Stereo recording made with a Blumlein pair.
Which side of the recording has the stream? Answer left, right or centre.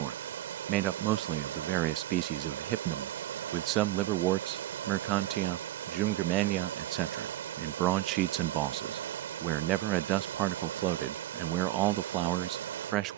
right.